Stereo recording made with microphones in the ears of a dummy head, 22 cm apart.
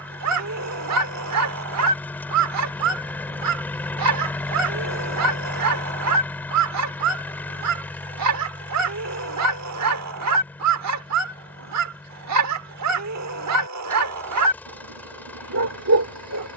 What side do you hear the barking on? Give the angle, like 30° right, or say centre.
70° right.